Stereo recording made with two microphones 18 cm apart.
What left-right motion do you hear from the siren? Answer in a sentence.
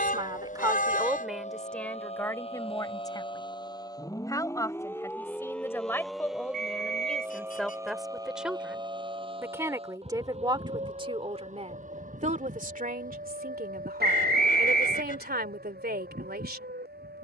In this clip you hear the siren move from left to right.